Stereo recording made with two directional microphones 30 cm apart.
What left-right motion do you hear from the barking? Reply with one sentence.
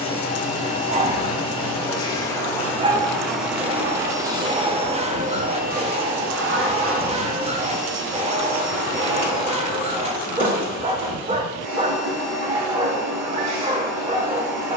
You can hear the barking stay put.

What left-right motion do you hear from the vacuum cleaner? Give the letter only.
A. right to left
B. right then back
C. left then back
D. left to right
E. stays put
D.